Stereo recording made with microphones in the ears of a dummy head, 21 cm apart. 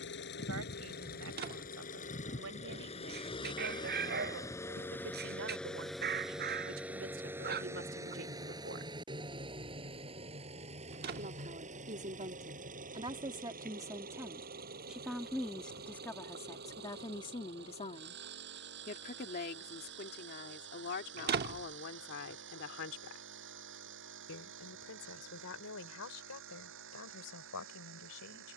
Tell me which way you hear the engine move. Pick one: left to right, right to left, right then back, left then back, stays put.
left to right.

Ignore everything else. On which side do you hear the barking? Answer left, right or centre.
right.